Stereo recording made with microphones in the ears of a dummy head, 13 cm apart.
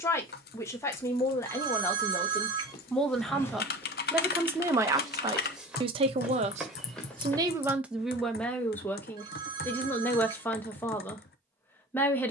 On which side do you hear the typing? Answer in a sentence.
You can hear the typing on the left.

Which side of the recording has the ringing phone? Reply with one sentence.
In this clip you hear the ringing phone on the right.